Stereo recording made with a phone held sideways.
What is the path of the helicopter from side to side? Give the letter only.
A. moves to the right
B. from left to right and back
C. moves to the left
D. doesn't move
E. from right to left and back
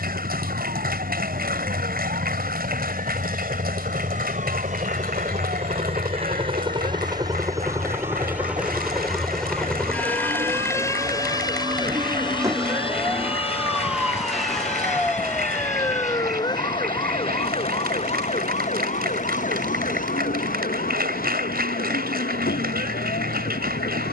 C.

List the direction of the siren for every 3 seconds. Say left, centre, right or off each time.
right, right, right, right, centre, left, left, left.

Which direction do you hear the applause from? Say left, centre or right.
right.